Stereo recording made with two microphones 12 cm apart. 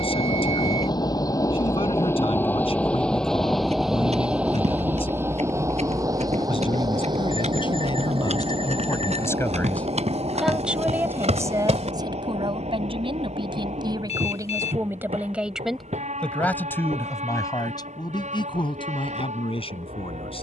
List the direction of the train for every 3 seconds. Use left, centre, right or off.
left, centre, right, right, right, right, right.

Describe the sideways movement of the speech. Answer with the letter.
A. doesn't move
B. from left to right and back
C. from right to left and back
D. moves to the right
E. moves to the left
B.